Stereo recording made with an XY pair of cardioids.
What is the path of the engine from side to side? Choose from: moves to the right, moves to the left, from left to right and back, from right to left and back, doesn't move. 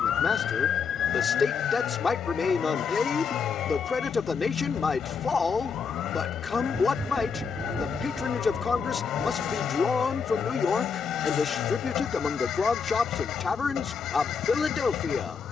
doesn't move.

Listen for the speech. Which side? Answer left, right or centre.
left.